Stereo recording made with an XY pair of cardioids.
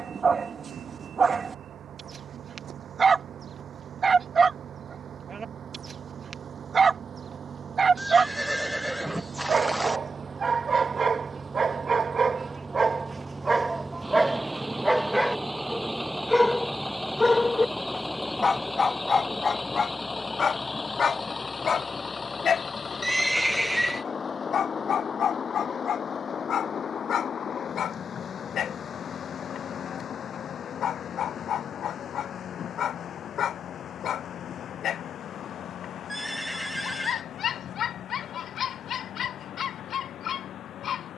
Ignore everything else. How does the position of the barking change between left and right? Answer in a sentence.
In this clip you hear the barking go from the right side to the left.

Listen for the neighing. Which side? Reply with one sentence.
You can hear the neighing in the centre.